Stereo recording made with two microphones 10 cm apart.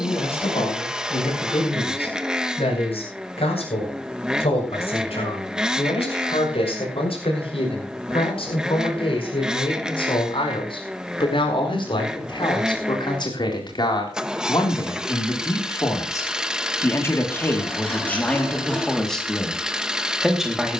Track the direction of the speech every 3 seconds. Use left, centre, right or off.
left, left, left, left, left, left, centre.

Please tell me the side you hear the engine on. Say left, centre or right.
centre.